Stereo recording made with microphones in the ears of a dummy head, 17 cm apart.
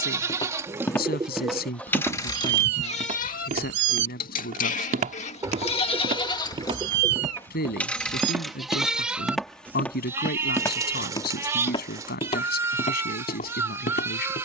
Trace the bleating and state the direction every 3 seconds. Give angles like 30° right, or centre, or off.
centre, 40° left, 10° left, 10° right, 10° right.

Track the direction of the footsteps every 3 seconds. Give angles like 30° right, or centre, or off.
centre, 40° right, 20° right, 10° left, 40° left.